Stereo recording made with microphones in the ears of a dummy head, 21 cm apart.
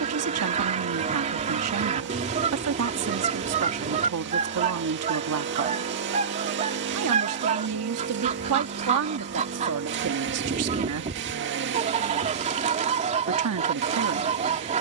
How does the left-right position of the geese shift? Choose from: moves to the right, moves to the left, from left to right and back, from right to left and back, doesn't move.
doesn't move.